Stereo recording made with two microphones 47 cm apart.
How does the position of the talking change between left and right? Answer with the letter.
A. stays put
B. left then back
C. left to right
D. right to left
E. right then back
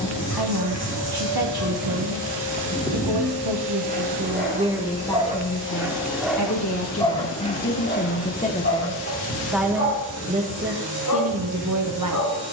B.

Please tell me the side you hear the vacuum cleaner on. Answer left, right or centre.
right.